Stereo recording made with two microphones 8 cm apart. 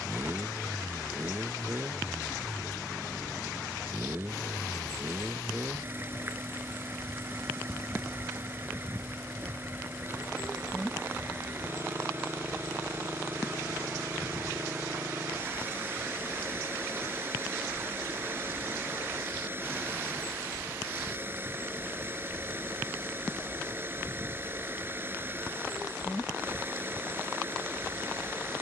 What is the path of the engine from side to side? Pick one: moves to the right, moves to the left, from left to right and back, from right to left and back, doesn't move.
doesn't move.